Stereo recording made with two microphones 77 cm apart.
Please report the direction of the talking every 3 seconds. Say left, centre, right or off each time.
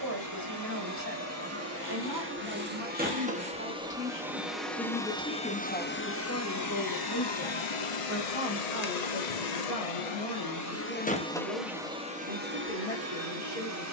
right, centre, left, left, left.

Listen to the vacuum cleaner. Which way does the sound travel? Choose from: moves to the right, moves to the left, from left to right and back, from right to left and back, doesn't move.
from right to left and back.